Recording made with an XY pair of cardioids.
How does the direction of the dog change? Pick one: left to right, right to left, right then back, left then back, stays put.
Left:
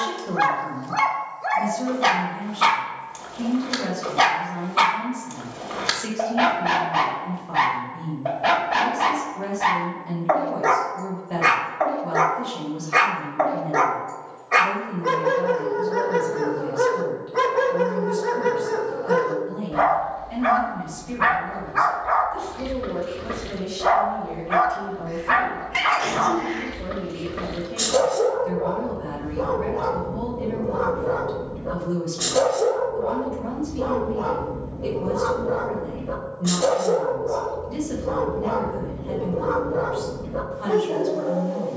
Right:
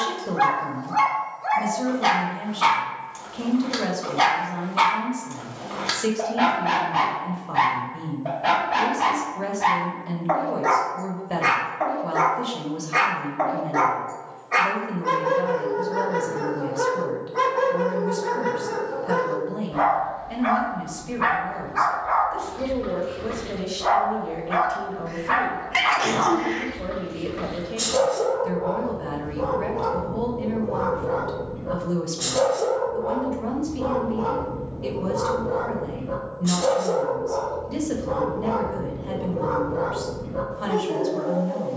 stays put.